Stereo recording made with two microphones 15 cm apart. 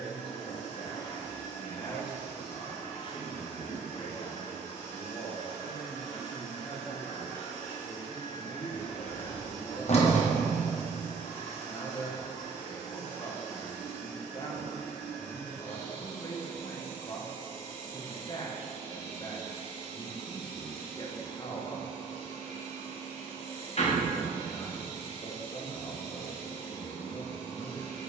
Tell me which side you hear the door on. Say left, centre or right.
left.